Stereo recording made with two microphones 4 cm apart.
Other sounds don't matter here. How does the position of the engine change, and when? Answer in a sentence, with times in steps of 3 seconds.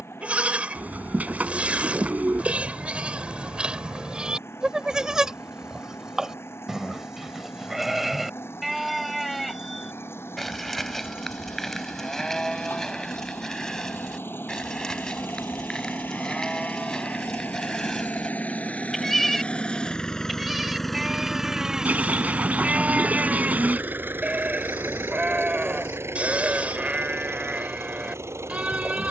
You can hear the engine on the left from 0 s and on the right from 21 s.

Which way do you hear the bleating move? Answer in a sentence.
In this clip you hear the bleating go left and come back.